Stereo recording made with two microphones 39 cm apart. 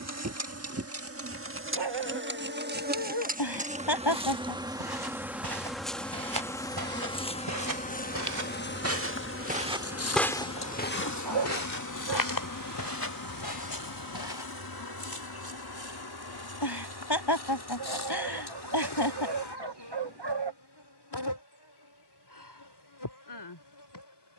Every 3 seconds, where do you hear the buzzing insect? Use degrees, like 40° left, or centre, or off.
30° right, 10° right, 20° left, 40° left, 50° left, 60° left, 70° left, 70° left.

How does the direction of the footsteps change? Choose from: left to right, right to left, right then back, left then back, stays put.
right to left.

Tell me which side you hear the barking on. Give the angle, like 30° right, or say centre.
80° right.